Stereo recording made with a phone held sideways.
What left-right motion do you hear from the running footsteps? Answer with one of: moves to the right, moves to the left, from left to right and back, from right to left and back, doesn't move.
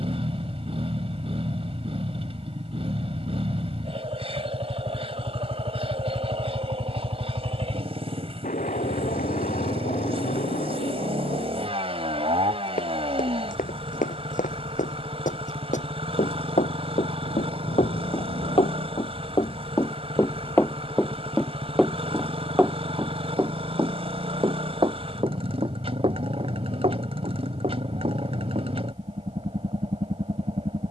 moves to the right.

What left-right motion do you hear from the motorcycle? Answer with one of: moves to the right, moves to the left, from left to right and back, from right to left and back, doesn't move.
doesn't move.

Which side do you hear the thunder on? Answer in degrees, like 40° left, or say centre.
80° left.